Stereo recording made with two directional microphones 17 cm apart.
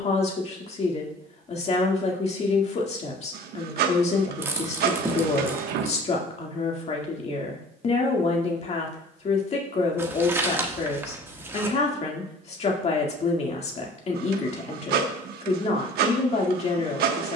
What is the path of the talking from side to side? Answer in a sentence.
You can hear the talking stay put.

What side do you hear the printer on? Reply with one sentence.
In this clip you hear the printer on the right.